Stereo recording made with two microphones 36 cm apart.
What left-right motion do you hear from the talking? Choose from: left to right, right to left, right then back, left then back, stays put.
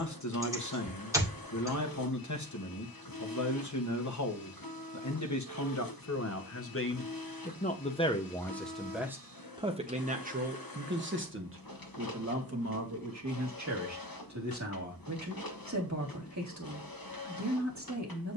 left to right.